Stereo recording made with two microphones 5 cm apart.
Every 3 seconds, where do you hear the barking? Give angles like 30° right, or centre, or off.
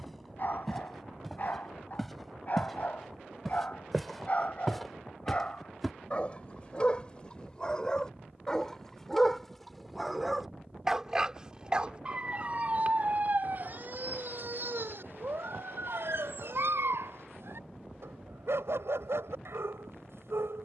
40° left, 40° left, 20° left, 10° right, 40° right, 70° right, 80° right.